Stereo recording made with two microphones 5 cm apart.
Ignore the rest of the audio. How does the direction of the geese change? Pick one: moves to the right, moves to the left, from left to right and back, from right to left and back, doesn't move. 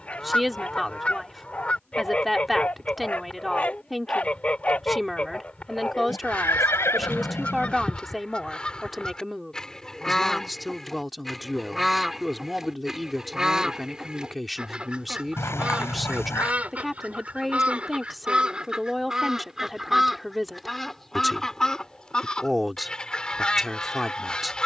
from left to right and back.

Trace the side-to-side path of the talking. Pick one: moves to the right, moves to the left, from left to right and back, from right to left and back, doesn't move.
doesn't move.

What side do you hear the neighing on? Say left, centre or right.
left.